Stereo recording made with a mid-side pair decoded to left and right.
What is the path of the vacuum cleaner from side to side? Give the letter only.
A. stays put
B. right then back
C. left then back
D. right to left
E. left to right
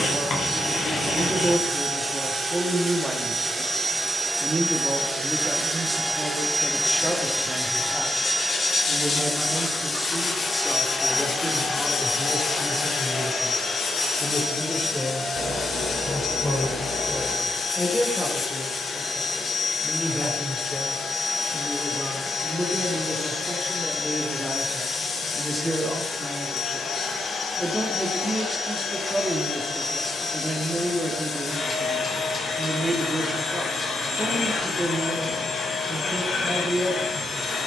D.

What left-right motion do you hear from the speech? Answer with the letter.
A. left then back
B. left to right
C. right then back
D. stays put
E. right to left
A.